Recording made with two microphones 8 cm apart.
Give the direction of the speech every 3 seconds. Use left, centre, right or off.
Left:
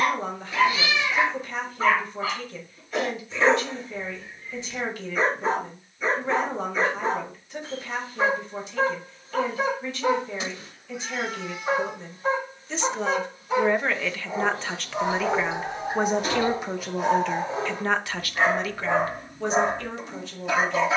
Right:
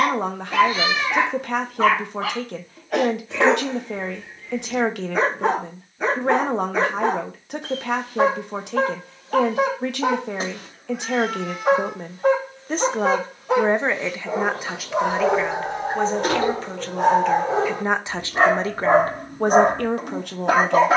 right, right, right, right, right, centre, right.